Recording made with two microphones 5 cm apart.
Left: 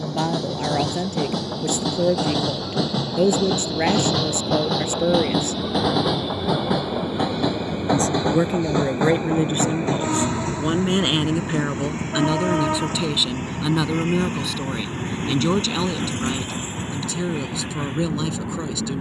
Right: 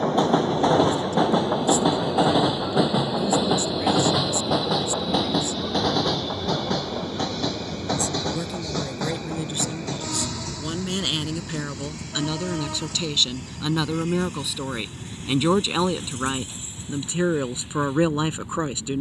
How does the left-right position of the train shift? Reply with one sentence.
In this clip you hear the train move to the left.